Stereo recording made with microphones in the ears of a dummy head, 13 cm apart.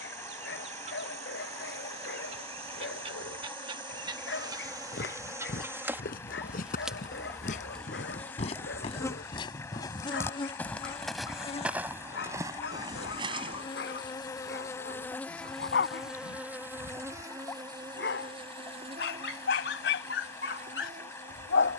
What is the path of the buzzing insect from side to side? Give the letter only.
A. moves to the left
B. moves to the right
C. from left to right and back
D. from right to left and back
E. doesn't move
D.